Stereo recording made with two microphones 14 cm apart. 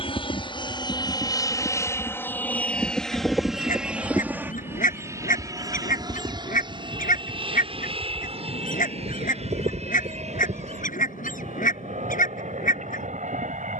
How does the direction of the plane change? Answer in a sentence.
You can hear the plane move to the right.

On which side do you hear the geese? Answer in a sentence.
You can hear the geese on the left.